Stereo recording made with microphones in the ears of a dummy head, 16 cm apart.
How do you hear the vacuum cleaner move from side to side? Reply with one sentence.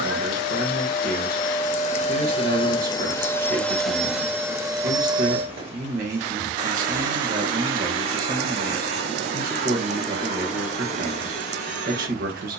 You can hear the vacuum cleaner travel towards the right.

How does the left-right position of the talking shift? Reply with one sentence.
In this clip you hear the talking stay put.